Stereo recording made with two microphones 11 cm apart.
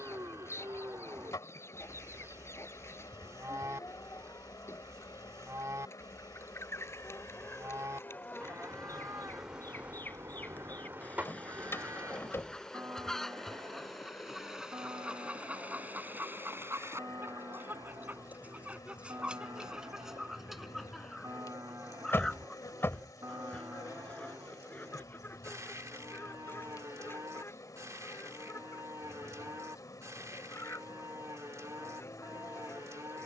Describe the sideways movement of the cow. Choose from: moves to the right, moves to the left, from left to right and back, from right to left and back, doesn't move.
doesn't move.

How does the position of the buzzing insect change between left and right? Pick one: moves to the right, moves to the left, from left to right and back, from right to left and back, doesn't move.
from left to right and back.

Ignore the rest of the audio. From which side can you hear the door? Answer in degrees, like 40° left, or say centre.
20° left.